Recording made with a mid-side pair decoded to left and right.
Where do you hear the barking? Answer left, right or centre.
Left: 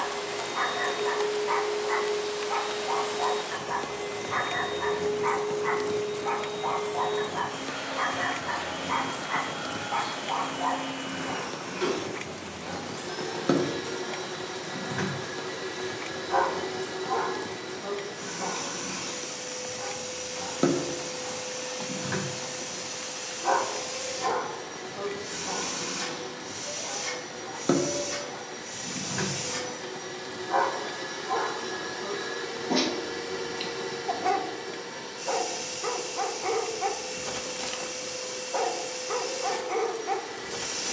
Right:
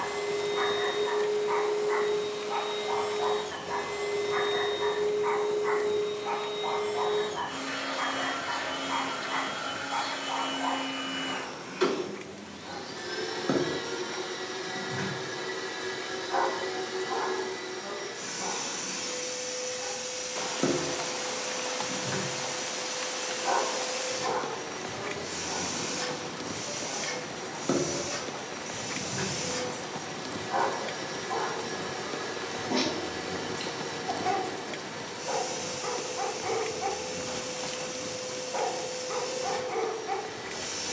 left.